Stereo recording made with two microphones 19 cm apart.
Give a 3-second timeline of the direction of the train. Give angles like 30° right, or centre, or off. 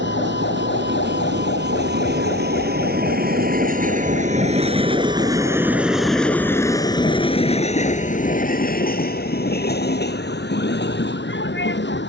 60° right, 30° right, 30° left, 60° left.